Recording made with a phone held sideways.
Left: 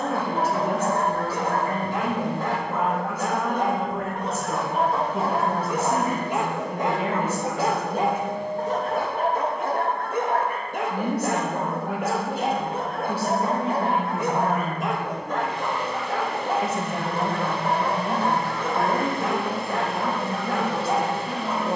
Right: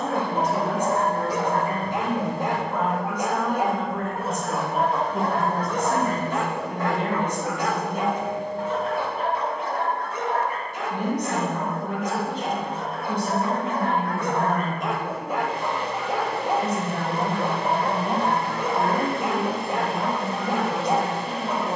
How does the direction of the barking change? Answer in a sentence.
In this clip you hear the barking move from right to left and back again.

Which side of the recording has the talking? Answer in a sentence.
You can hear the talking in the centre.